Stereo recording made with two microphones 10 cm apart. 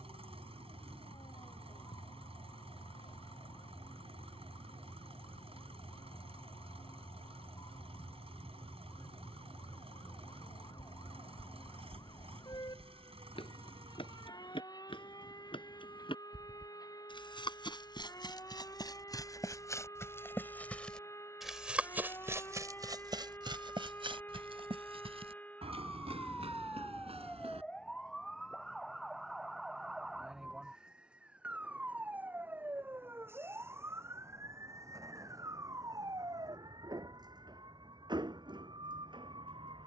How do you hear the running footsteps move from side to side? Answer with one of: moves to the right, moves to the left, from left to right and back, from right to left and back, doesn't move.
moves to the right.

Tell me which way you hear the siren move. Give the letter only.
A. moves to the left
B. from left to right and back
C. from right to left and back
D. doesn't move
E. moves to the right
E.